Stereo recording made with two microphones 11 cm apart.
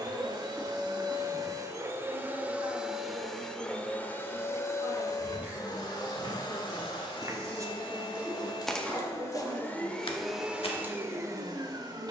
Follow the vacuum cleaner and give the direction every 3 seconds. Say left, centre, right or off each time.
right, left, left, centre.